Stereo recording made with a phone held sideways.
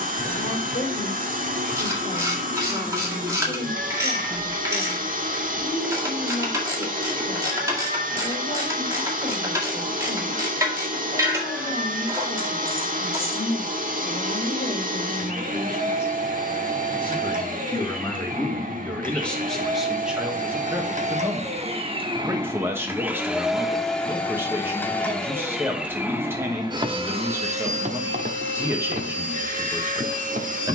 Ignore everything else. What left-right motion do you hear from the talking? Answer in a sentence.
In this clip you hear the talking travel towards the right.